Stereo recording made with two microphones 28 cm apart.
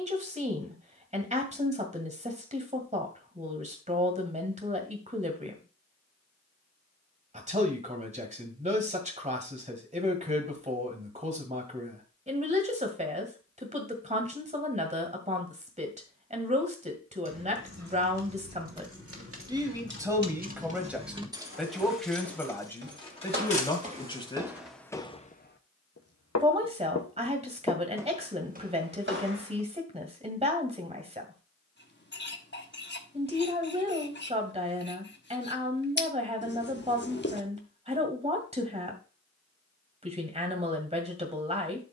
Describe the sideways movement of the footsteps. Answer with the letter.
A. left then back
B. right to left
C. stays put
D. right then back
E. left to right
A.